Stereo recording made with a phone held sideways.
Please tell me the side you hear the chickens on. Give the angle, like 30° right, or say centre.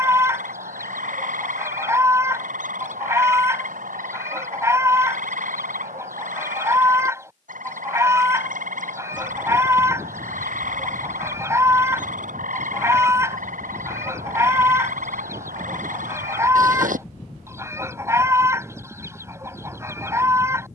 20° right.